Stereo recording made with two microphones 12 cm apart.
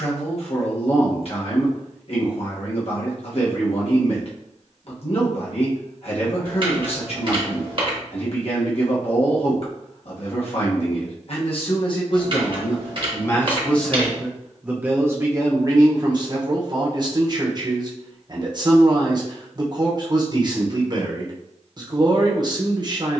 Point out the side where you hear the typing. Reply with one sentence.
You can hear the typing on the right.